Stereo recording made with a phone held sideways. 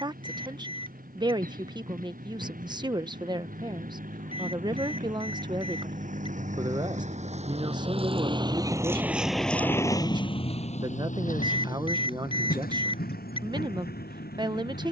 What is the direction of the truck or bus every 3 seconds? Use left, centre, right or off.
right, right, right, left, left.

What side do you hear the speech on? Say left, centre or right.
right.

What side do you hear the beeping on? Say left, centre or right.
left.